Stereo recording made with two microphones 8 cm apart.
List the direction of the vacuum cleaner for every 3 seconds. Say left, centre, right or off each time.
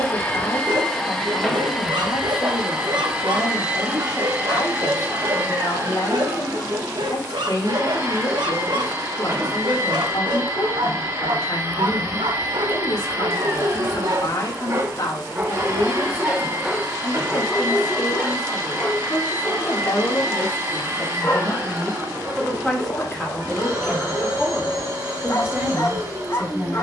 centre, right, right, right, right, right, right, right, right.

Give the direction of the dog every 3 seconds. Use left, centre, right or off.
right, right, right, right, right, centre, left, left, left.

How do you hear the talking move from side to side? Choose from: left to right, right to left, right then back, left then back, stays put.
left to right.